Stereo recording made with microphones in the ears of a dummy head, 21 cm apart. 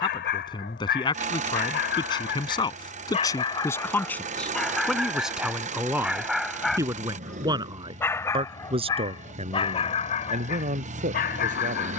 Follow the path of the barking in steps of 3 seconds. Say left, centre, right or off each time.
left, centre, centre, left.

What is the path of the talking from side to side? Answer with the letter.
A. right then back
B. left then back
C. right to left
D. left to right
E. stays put
D.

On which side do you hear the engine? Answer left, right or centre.
right.